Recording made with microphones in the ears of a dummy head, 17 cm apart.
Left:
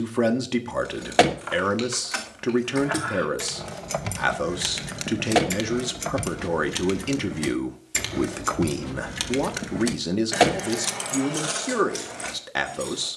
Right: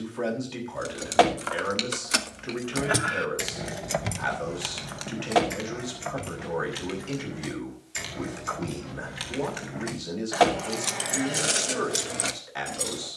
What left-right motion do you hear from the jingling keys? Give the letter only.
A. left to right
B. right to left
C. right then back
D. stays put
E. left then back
E.